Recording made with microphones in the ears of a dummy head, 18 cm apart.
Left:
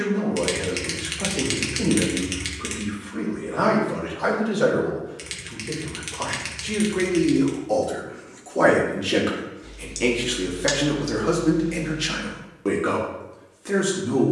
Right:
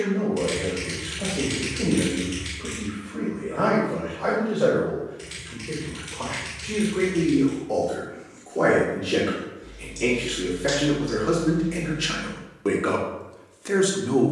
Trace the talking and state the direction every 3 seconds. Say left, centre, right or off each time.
left, left, left, left, centre.